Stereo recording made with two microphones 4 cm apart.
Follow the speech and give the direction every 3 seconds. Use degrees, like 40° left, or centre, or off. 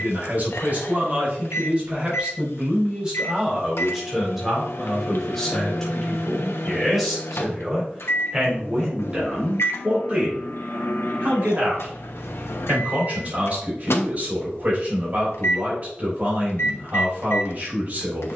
30° right, centre, 10° right, 30° right, 40° right, 40° right.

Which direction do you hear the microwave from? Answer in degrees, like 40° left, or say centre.
80° left.